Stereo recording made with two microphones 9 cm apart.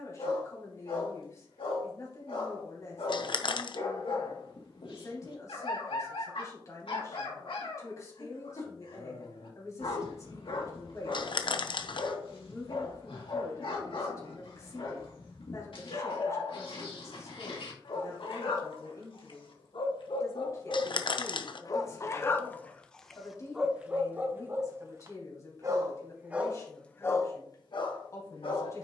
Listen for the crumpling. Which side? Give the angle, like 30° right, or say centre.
60° left.